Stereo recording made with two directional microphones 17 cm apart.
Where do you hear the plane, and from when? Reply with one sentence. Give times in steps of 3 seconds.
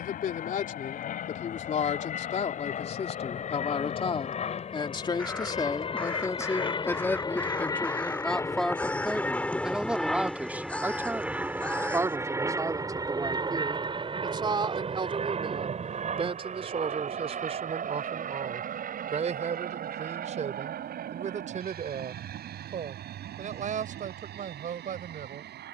You can hear the plane on the left from 0 s, in the centre from 9 s and on the right from 12 s.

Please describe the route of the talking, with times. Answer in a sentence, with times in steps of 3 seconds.
You can hear the talking on the left from 0 s, in the centre from 6 s and on the right from 12 s.